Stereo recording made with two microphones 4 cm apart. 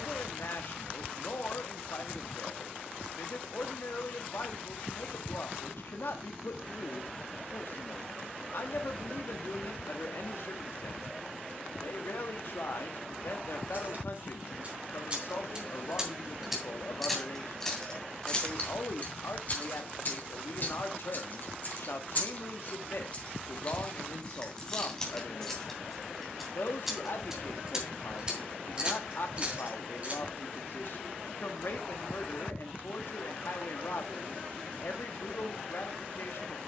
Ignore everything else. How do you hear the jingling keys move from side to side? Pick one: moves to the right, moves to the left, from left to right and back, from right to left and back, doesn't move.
from right to left and back.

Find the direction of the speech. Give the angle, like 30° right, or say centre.
60° left.